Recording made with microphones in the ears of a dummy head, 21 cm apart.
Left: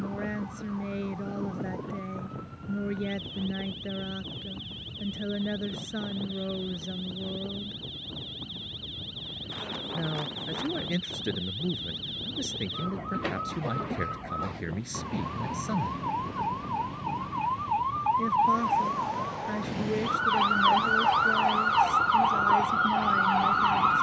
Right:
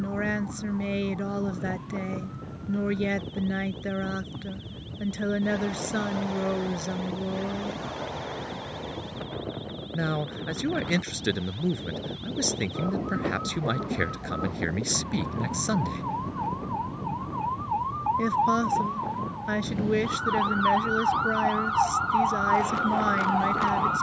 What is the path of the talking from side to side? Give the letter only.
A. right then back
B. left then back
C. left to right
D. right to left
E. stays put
E.